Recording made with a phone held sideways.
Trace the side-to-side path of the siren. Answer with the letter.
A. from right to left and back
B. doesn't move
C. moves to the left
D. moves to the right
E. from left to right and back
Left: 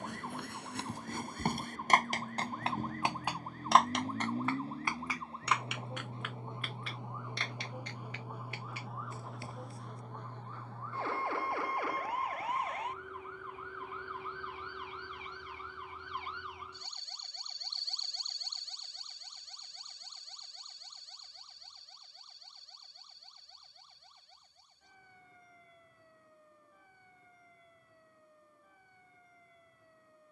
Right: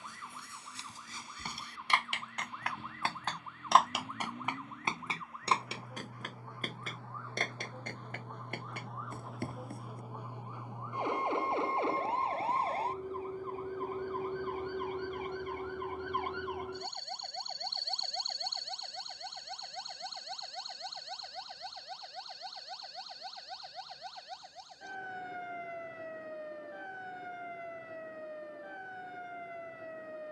D.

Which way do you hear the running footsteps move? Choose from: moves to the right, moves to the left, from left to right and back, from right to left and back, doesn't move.
moves to the right.